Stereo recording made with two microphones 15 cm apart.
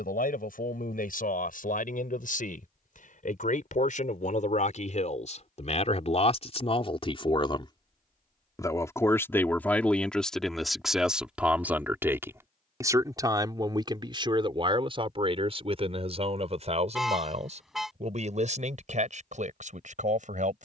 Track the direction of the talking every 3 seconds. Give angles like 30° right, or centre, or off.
70° left, 50° left, 30° left, centre, 30° right, 40° right, 50° right.